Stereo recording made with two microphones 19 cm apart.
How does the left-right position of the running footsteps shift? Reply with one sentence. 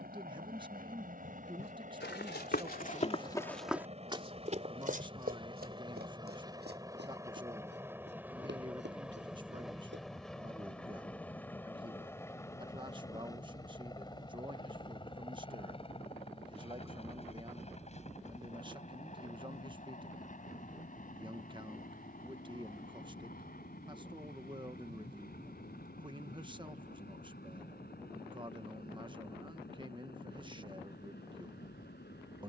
You can hear the running footsteps go from the left side to the right.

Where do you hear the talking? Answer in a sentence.
You can hear the talking on the right.